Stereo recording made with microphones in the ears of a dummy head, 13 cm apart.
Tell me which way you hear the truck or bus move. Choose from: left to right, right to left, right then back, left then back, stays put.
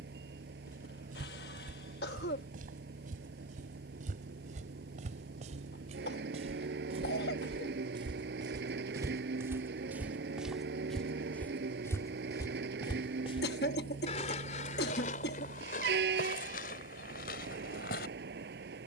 stays put.